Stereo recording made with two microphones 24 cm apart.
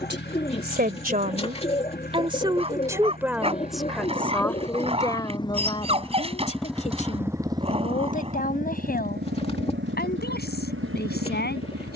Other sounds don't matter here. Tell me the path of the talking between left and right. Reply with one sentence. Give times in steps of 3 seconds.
In this clip you hear the talking on the right from 0 s, in the centre from 3 s and on the left from 6 s.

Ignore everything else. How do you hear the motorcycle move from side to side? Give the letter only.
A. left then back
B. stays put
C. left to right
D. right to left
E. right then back
C.